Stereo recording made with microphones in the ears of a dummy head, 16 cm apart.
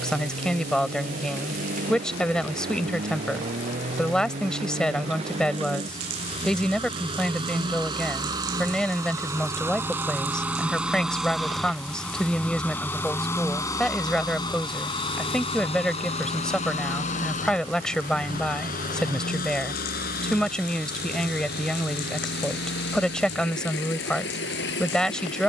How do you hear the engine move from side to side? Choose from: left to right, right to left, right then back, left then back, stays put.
right to left.